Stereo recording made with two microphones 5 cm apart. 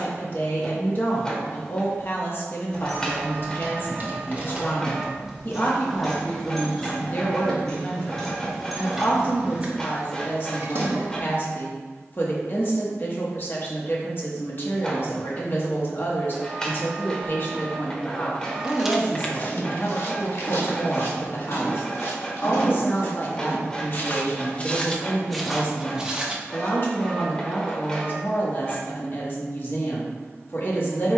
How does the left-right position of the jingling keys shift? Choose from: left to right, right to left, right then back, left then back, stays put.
left then back.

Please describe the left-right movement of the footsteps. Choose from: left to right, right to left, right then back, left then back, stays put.
left then back.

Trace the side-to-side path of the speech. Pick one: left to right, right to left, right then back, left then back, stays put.
stays put.